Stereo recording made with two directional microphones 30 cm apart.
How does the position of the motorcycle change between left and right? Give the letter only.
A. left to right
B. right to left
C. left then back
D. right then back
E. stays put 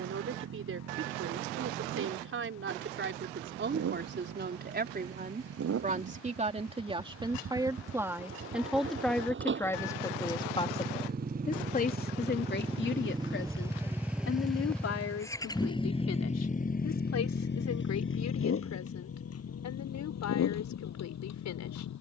B.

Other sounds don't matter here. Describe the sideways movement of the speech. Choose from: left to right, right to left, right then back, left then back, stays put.
right to left.